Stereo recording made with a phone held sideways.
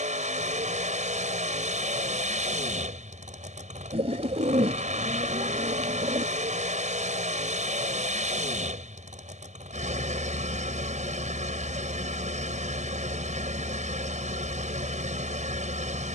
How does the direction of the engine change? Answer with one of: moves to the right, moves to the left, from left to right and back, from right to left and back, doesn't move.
doesn't move.